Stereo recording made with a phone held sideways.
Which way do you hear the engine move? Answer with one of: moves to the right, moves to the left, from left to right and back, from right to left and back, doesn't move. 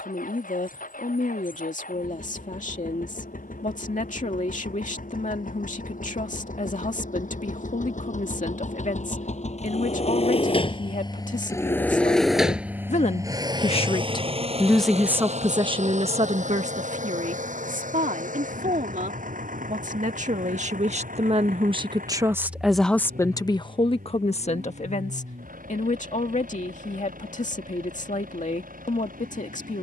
moves to the right.